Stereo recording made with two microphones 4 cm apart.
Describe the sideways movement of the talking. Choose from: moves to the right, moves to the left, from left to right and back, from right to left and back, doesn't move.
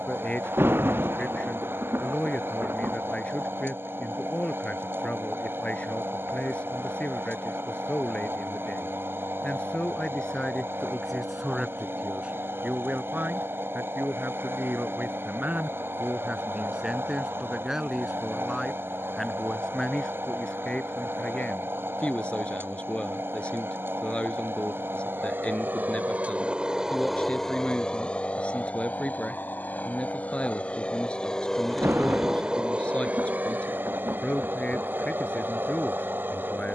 from left to right and back.